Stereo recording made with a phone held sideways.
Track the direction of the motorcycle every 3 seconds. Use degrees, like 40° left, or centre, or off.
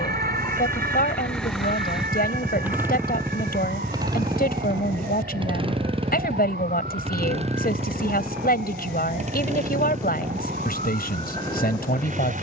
centre, 30° right, 40° right, 50° right.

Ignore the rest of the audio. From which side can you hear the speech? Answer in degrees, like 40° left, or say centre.
70° left.